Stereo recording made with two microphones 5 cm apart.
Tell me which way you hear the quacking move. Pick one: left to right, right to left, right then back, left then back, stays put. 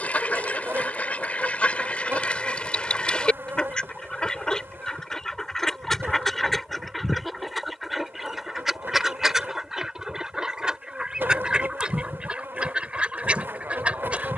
left to right.